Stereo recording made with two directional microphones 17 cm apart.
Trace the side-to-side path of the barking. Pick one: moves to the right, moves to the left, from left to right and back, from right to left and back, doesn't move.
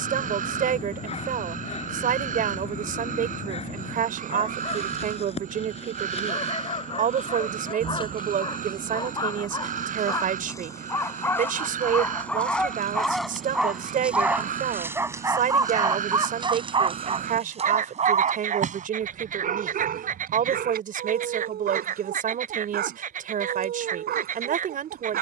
moves to the right.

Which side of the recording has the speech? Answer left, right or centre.
right.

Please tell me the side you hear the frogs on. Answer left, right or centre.
right.